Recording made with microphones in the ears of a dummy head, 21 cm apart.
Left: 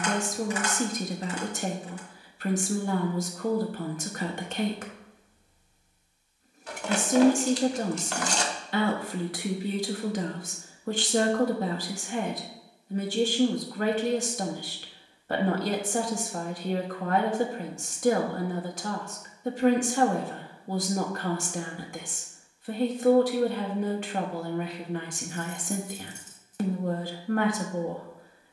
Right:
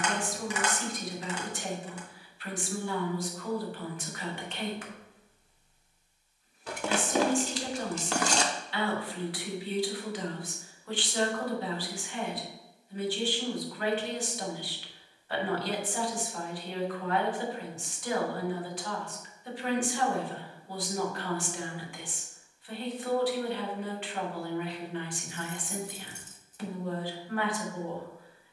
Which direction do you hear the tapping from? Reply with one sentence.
In this clip you hear the tapping on the right.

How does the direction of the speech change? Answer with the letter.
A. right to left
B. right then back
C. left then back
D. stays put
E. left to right
D.